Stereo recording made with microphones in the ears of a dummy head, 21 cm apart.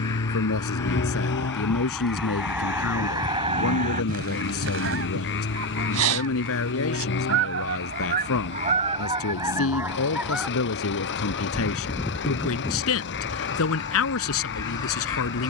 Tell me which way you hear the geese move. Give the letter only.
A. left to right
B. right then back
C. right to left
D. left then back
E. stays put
B.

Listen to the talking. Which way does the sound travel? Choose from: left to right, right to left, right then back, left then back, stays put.
stays put.